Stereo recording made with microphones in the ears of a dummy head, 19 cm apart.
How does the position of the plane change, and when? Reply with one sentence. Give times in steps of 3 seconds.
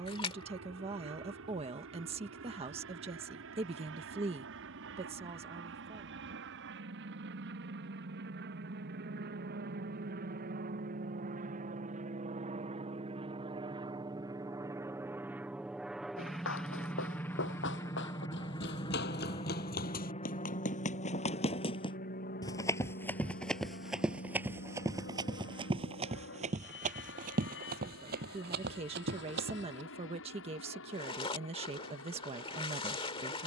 You can hear the plane on the right from 0 s, in the centre from 15 s and on the left from 18 s.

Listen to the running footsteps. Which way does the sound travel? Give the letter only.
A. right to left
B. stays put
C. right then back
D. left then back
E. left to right
E.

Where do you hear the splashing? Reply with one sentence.
In this clip you hear the splashing on the left.